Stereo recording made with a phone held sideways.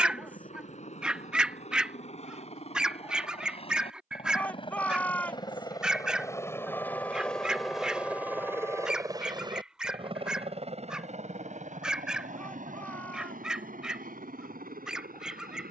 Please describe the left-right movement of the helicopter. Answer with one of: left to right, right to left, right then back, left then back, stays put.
left to right.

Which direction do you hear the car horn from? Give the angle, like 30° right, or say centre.
20° left.